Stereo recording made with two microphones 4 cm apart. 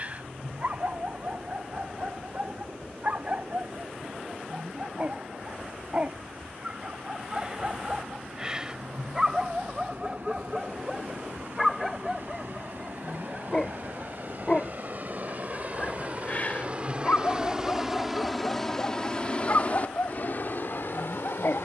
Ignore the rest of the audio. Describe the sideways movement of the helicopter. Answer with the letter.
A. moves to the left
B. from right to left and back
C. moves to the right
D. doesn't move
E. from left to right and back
A.